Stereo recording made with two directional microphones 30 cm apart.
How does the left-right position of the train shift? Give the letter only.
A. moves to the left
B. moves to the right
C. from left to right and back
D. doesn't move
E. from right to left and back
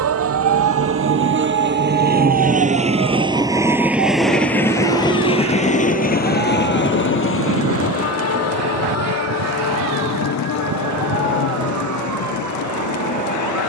A.